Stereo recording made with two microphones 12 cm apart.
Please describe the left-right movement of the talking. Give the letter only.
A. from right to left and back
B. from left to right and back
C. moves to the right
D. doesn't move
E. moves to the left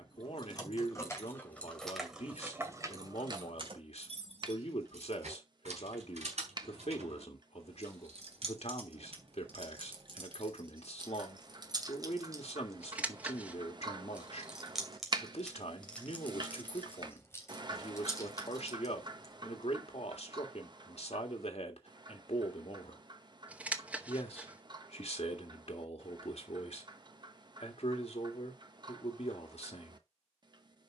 D.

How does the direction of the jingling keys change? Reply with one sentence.
You can hear the jingling keys go right and come back.